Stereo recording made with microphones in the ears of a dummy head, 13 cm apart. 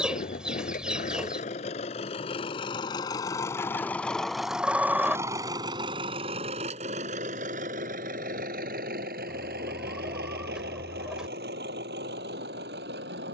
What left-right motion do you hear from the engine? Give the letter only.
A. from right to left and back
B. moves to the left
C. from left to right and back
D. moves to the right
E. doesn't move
D.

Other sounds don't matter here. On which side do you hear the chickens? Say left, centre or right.
centre.